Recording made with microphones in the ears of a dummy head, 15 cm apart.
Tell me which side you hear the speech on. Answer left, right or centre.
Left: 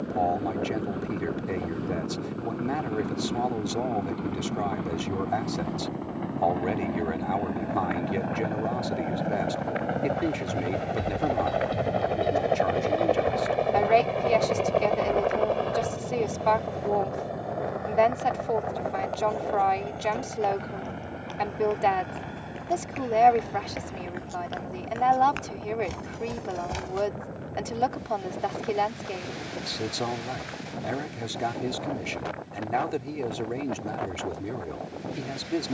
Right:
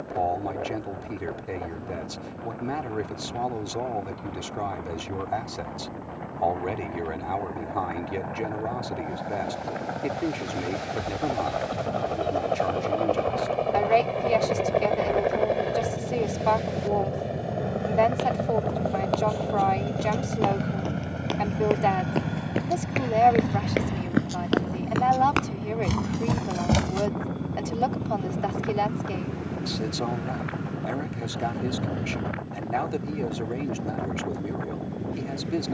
centre.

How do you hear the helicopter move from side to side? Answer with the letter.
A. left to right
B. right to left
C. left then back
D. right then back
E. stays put
A.